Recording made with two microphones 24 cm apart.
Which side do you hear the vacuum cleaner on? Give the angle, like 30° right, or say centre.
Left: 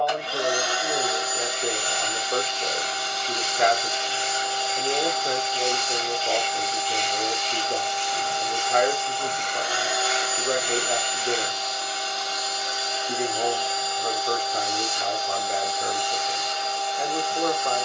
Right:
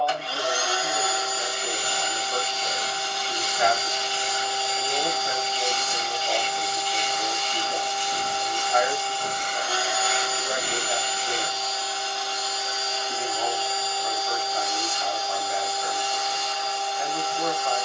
20° left.